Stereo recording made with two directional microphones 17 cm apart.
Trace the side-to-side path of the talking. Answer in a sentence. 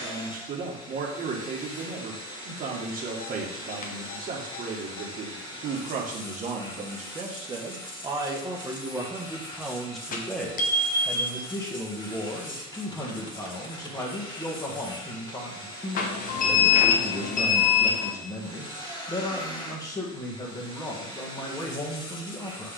You can hear the talking move from right to left.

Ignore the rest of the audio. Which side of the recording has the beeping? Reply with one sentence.
In this clip you hear the beeping on the left.